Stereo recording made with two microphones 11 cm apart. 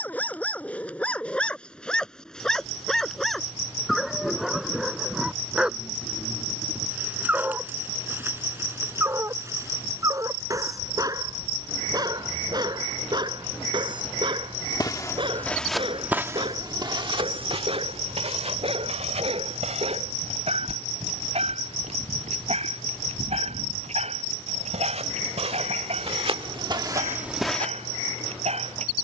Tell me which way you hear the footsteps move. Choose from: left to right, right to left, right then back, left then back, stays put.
right then back.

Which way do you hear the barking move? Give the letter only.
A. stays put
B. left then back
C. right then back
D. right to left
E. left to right
E.